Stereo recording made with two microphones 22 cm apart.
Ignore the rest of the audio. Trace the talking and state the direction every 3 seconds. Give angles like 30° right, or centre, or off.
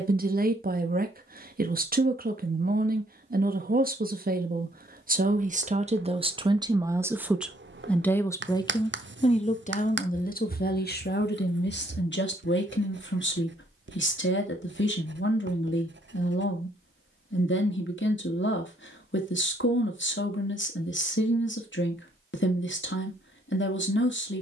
40° right, 40° right, centre, 40° left, 60° left, 60° left, 60° left, 60° left.